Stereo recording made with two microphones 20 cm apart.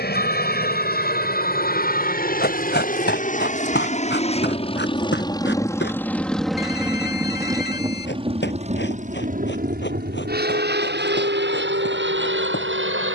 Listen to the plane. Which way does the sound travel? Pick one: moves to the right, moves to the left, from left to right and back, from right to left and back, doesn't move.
moves to the right.